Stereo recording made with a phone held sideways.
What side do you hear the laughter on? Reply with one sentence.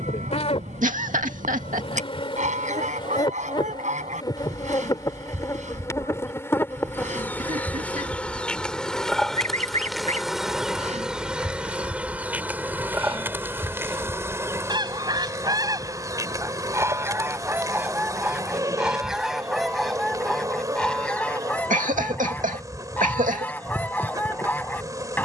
In this clip you hear the laughter on the right.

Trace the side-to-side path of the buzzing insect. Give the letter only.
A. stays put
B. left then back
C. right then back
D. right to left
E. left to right
E.